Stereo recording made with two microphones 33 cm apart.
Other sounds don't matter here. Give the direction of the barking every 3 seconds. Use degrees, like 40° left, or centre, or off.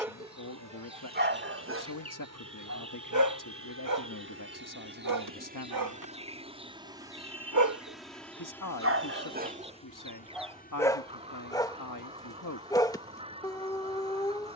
30° right, 70° right, 60° right, 10° right, 10° left.